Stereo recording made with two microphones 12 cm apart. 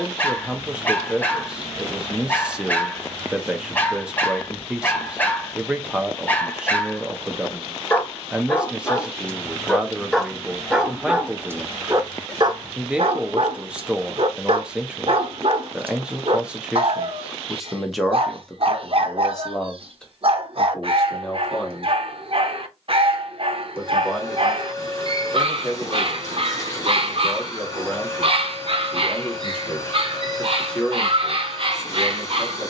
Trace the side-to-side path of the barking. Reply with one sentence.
In this clip you hear the barking go from the left side to the right.